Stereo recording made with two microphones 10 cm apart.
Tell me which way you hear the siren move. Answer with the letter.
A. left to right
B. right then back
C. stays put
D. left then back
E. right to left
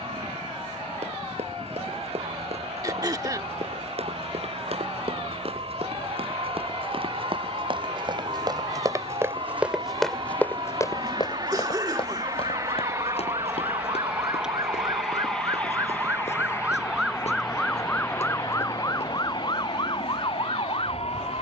E.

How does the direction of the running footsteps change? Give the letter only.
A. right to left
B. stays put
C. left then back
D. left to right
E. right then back
A.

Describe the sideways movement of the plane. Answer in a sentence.
You can hear the plane travel towards the left.